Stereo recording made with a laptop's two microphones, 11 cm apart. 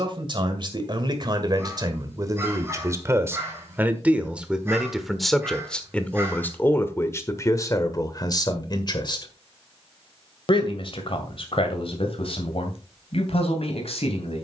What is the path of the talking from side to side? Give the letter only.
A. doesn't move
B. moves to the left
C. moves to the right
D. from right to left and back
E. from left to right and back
B.